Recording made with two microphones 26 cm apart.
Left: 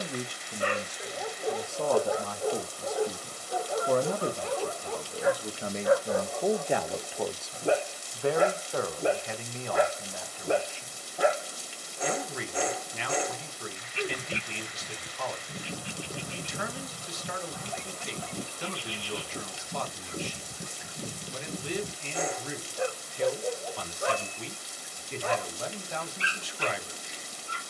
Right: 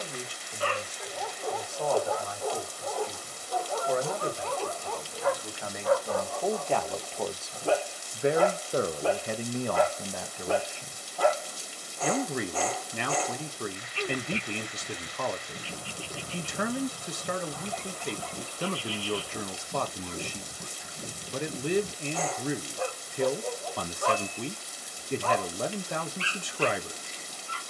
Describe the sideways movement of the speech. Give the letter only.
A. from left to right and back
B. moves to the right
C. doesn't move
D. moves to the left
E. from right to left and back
B.